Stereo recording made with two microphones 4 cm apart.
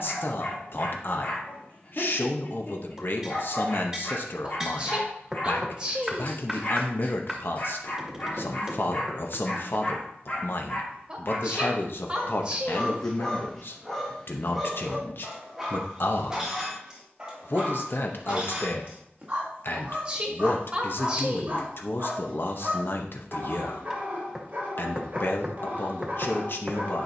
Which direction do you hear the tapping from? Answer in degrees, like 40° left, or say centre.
10° right.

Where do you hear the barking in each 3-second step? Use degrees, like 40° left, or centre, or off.
40° left, 40° left, 40° left, 30° left, 10° left, 10° right, 30° right, 30° right, 30° right.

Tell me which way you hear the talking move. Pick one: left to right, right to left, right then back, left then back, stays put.
stays put.